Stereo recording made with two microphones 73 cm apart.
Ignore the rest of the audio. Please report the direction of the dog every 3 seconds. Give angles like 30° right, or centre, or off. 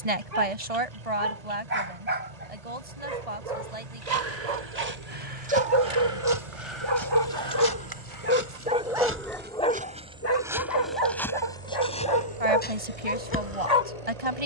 60° right, 50° right, 30° right, 20° left, 50° left.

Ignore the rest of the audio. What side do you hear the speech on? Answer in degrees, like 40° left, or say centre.
50° right.